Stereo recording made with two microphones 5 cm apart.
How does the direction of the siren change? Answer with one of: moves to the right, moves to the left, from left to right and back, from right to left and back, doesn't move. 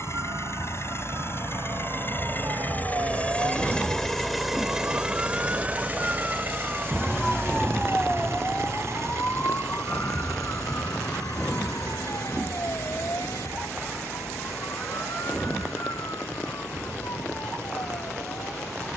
moves to the left.